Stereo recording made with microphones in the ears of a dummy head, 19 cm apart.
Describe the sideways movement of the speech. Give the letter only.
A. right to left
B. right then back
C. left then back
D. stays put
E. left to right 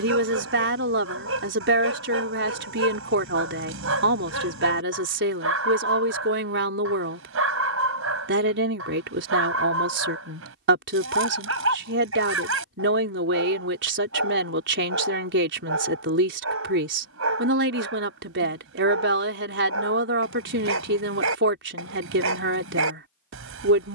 D.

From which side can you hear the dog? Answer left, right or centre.
right.